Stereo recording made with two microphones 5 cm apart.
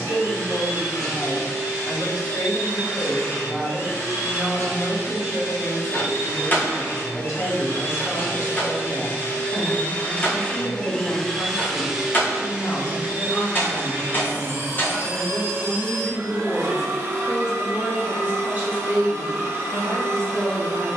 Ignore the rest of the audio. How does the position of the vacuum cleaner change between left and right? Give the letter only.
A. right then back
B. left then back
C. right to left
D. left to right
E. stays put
D.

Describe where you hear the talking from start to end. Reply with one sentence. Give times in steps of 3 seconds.
In this clip you hear the talking on the left from 0 s, in the centre from 15 s and on the right from 18 s.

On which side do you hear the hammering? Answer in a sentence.
You can hear the hammering on the left.